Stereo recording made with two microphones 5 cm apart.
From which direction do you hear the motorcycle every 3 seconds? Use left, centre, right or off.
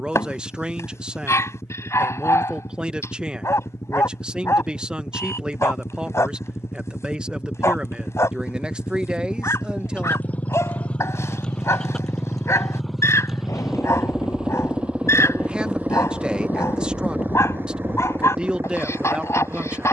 left, left, left, left, centre, right, right.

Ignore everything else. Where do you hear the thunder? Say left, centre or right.
left.